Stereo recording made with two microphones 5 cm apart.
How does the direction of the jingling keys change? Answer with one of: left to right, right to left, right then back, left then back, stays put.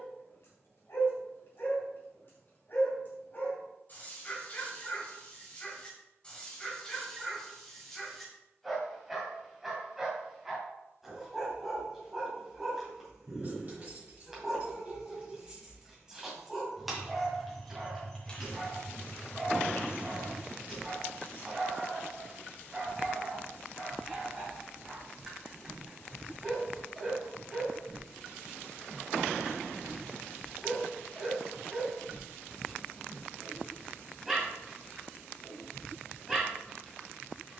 right to left.